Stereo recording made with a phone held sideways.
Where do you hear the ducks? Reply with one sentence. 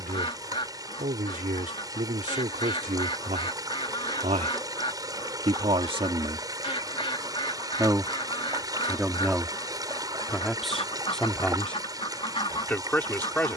You can hear the ducks on the left.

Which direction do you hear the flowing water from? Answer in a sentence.
In this clip you hear the flowing water on the right.